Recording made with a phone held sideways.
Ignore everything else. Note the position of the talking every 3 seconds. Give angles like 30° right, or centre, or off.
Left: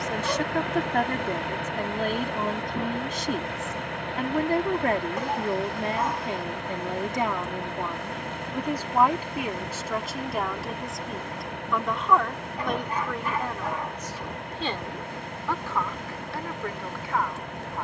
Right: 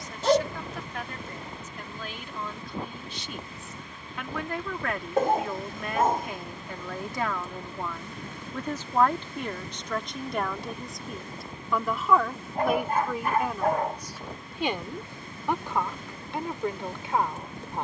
50° left, 40° left, 20° left, centre, 10° right, 20° right.